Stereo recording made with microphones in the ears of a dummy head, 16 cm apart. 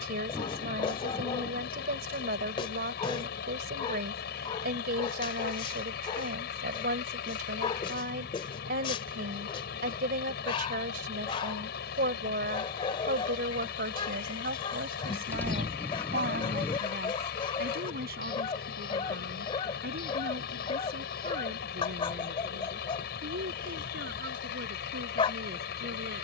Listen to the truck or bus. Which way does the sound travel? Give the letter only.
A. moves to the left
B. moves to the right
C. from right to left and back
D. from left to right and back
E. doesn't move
E.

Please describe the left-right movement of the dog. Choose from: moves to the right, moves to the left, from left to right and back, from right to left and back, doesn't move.
doesn't move.